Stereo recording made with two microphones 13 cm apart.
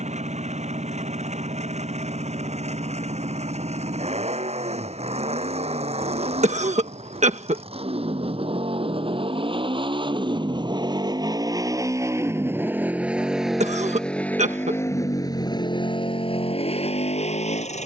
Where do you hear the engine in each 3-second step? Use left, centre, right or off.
right, right, right, right, centre, left.